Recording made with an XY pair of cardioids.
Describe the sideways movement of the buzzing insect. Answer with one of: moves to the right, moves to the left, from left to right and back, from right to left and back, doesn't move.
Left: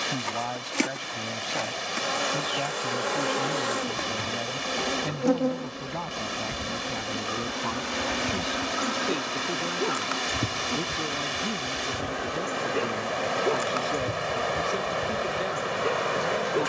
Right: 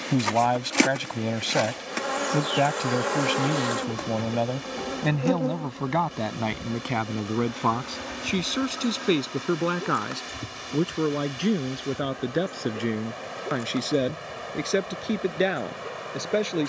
moves to the left.